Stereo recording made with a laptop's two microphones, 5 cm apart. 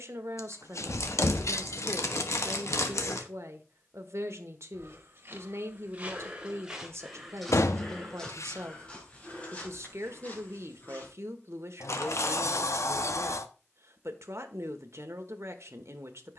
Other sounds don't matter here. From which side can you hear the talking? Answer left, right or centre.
right.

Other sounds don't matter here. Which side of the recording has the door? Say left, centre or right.
left.